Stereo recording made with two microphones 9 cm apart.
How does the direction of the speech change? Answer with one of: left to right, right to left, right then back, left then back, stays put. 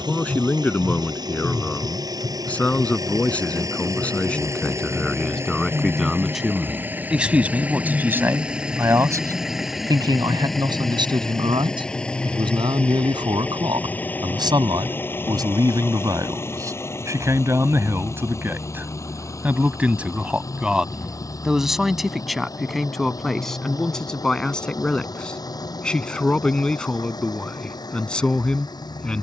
right then back.